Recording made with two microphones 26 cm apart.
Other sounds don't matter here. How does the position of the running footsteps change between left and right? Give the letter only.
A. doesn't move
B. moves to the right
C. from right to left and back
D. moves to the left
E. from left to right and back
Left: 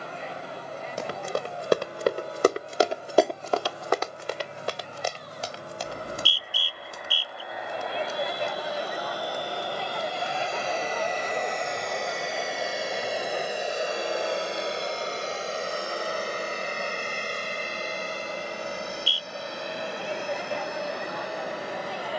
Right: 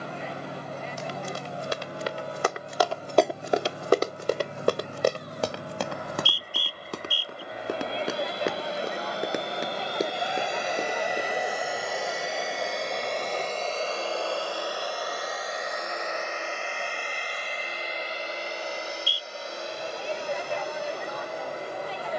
B.